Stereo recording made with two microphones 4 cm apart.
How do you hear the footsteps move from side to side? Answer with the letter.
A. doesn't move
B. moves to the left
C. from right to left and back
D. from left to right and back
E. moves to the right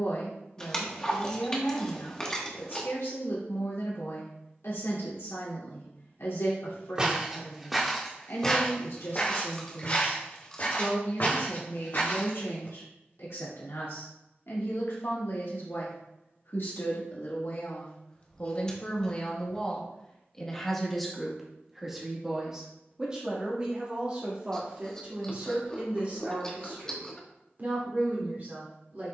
B.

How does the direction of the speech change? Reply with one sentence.
You can hear the speech move to the right.